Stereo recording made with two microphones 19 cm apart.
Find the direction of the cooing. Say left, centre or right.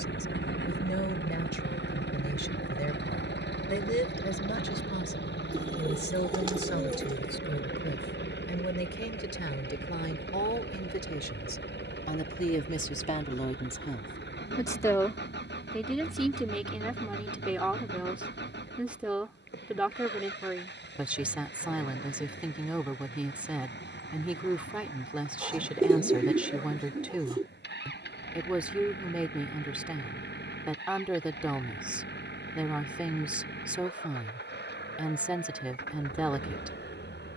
right.